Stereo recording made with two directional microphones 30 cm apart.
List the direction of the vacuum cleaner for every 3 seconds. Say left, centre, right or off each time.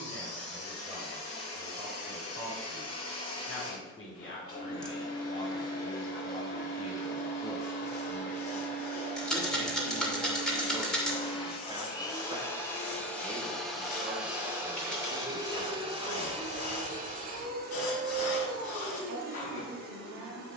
left, left, left, left, centre, right, right.